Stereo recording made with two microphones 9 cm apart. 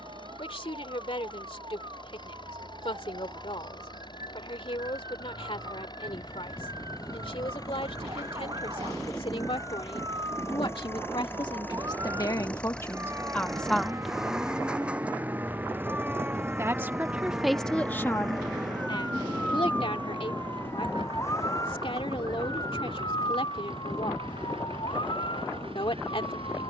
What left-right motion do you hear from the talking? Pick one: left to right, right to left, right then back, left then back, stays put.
right then back.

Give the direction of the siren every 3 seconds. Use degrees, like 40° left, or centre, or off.
50° right, 50° right, 50° right, 40° right, 30° right, 10° right, 10° left, 40° left, 60° left.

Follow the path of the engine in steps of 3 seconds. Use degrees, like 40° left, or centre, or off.
60° left, 50° left, 40° left, 30° left, centre, 30° right, 50° right, 70° right, 70° right.